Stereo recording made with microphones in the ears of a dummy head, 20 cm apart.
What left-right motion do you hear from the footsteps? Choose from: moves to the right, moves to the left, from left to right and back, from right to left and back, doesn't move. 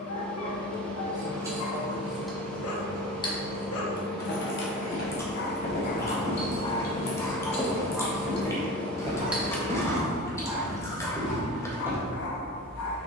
moves to the right.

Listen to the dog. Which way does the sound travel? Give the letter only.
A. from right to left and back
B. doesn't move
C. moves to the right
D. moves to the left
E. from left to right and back
E.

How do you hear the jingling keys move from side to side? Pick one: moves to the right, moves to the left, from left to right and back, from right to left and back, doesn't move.
from right to left and back.